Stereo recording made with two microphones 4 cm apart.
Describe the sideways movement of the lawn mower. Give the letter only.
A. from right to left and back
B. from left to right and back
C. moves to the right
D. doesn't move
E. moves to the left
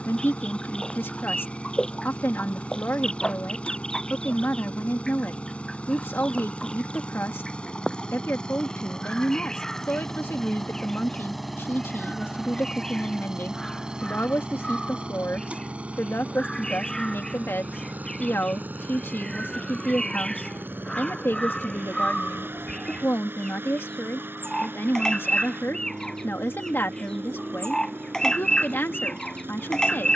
C.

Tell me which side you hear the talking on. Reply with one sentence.
In this clip you hear the talking on the left.